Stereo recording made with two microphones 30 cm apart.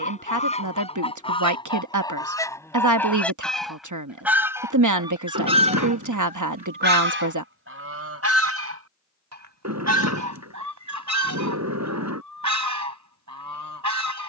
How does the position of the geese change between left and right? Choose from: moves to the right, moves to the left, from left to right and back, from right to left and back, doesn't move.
moves to the right.